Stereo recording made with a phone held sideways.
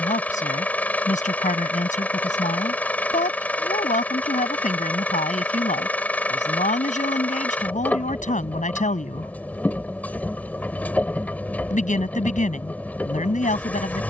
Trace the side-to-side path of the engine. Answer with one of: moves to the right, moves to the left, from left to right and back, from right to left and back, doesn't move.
doesn't move.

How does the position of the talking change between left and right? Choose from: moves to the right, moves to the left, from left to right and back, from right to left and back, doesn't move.
doesn't move.